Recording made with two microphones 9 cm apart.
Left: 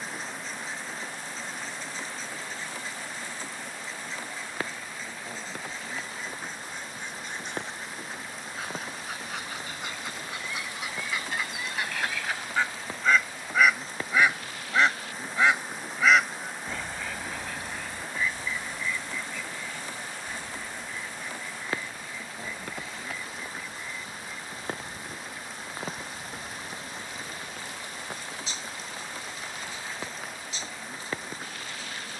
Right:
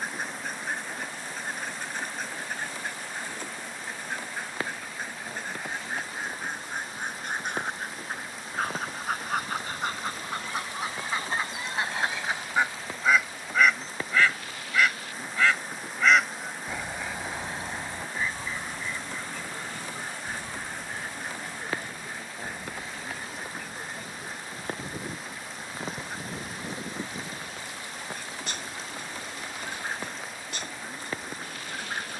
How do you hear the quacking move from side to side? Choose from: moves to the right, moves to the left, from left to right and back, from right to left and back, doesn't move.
from right to left and back.